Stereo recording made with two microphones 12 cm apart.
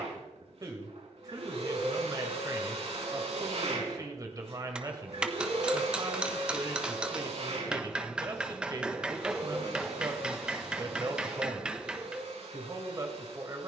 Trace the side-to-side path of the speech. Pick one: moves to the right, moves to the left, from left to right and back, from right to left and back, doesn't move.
doesn't move.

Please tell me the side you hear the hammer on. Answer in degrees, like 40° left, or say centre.
10° right.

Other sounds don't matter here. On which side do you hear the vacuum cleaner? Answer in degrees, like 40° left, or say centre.
70° right.